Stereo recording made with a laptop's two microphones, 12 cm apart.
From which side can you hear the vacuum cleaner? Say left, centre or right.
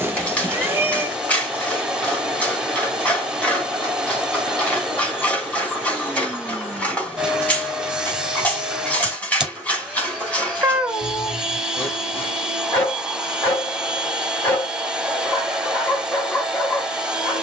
centre.